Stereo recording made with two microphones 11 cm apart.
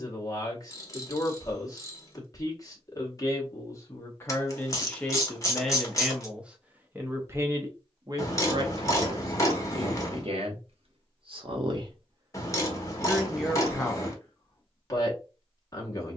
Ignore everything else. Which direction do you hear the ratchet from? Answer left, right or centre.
left.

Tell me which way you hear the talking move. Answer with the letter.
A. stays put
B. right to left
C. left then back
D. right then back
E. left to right
D.